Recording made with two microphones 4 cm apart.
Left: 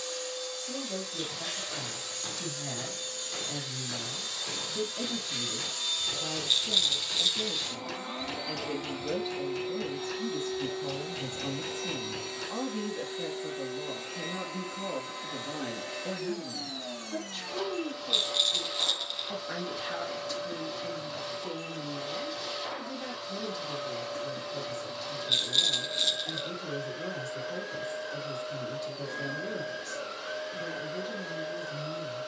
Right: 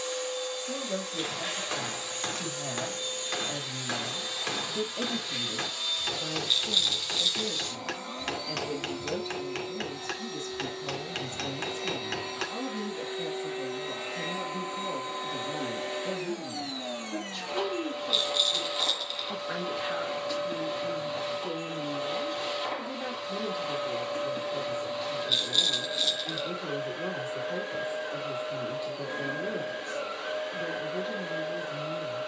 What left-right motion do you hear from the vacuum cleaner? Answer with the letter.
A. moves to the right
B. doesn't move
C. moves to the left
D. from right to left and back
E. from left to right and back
D.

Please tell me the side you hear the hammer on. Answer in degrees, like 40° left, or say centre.
60° right.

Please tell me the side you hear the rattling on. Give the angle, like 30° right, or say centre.
centre.